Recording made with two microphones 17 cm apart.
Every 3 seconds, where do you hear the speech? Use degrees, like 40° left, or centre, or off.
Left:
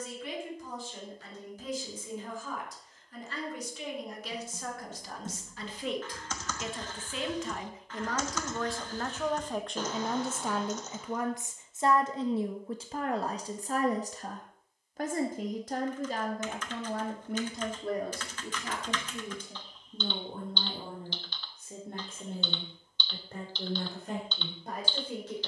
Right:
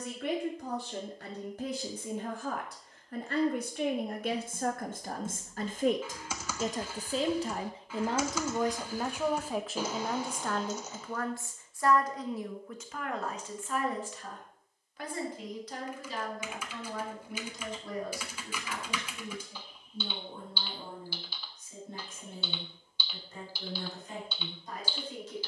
70° right, 60° right, 30° right, 10° left, 40° left, 50° left, 60° left, 70° left, 70° left.